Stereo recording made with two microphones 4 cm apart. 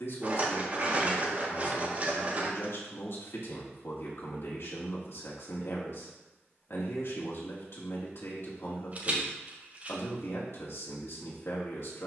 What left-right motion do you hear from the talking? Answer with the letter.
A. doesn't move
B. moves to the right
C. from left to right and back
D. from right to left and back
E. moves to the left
A.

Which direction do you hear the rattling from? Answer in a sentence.
You can hear the rattling on the right.